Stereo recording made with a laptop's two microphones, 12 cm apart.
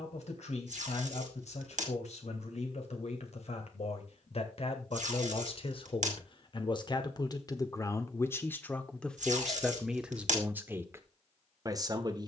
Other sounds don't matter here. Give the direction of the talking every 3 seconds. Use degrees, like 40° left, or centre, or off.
70° left, 60° left, 30° left, 10° right.